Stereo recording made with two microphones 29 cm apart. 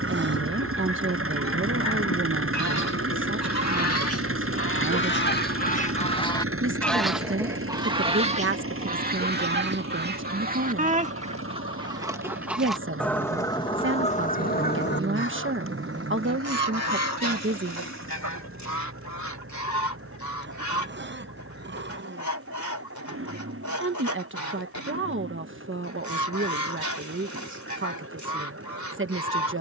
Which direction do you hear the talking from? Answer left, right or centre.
right.